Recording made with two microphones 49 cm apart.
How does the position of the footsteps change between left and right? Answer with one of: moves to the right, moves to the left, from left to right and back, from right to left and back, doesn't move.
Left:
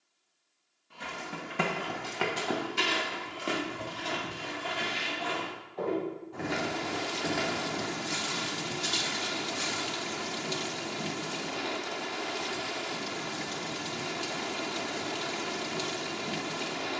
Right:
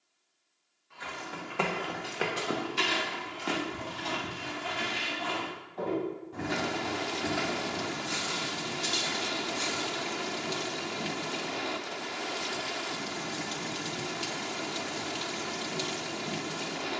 from left to right and back.